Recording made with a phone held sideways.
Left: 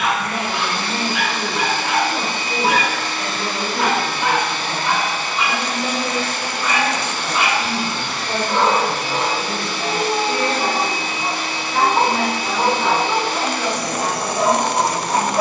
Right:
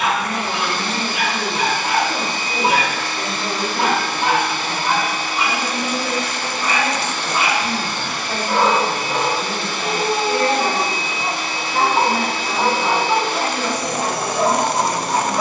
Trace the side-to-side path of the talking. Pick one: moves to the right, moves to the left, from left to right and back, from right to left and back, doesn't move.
from right to left and back.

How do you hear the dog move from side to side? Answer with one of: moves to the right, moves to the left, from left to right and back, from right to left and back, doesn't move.
moves to the left.